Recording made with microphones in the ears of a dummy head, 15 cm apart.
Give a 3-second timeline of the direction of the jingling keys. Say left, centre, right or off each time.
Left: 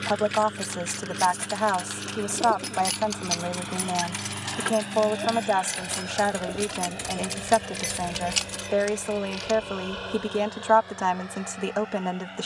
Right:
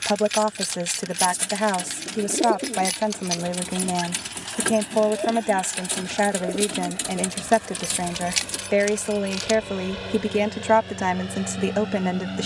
right, centre, centre, right.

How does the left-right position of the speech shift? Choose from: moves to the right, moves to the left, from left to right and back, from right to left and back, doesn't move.
doesn't move.